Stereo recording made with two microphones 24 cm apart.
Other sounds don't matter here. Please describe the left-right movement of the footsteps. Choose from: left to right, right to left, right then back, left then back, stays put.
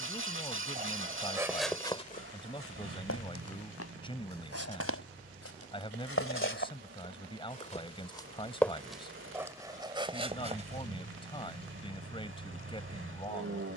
left then back.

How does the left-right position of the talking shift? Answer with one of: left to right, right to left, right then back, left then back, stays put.
stays put.